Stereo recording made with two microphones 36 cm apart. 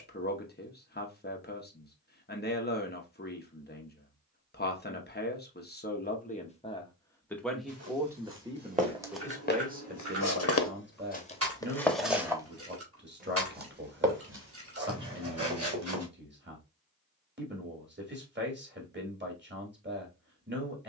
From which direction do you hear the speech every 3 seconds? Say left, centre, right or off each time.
left, left, centre, right, right, right, right.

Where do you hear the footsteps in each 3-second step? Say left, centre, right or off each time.
off, off, right, left, right, right, off.